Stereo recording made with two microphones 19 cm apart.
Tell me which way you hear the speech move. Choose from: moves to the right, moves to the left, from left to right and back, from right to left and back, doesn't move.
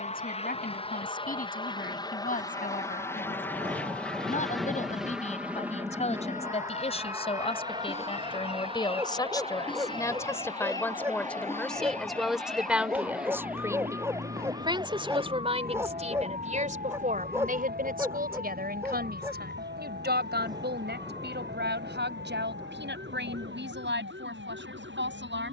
moves to the right.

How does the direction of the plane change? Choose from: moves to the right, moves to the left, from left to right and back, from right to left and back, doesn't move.
moves to the right.